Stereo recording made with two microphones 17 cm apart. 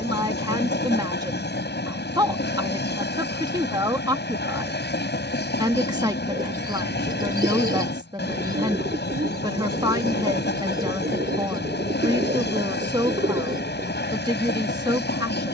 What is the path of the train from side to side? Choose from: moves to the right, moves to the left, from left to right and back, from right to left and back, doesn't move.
doesn't move.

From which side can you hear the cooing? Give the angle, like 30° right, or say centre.
60° right.